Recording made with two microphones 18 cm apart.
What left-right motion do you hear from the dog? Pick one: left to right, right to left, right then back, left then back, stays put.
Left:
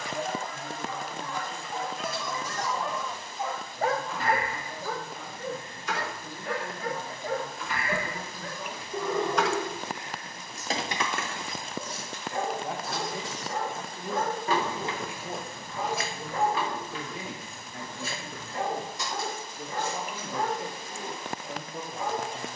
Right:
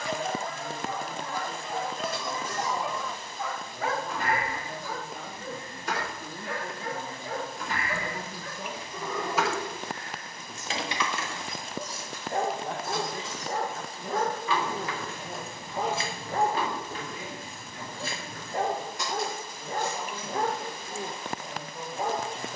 left then back.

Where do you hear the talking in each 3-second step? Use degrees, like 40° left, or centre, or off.
60° right, 60° right, 50° right, 20° right, 20° left, 50° left, 70° left, 80° left.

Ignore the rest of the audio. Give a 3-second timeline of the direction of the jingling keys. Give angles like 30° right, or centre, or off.
60° right, 60° right, 40° right, 30° left, 60° left, 30° right, 60° right, off.